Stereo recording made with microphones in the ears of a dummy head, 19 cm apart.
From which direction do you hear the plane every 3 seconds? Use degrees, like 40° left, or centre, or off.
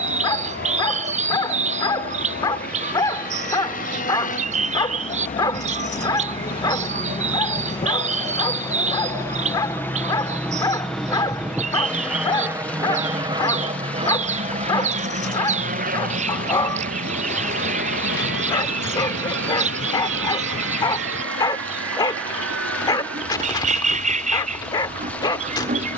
50° left, 40° left, 30° left, 10° left, 20° right, 40° right, 60° right, 70° right, 70° right.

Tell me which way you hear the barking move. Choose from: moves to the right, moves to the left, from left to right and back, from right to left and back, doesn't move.
doesn't move.